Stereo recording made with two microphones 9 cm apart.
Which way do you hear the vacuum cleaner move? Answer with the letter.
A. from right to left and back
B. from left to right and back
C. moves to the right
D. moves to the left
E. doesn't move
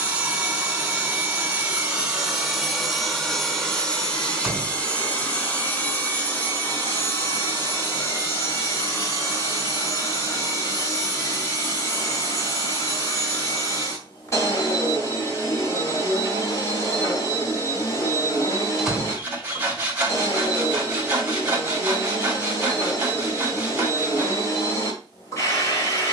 D.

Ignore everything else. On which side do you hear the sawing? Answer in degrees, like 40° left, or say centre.
20° right.